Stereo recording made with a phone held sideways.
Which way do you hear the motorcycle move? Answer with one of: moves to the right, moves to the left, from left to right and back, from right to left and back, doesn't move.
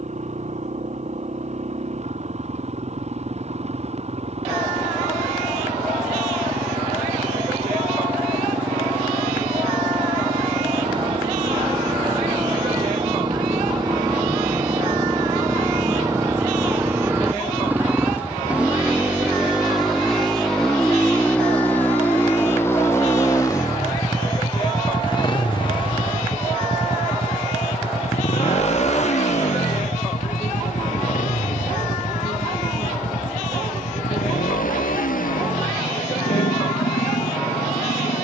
moves to the left.